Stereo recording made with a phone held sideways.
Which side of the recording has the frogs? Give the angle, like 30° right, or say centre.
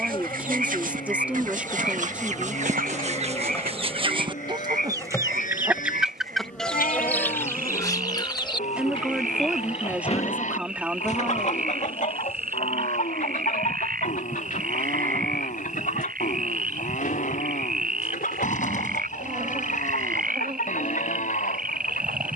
70° right.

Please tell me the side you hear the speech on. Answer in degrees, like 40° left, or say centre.
10° right.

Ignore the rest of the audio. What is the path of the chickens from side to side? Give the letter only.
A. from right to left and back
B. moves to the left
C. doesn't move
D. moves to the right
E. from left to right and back
B.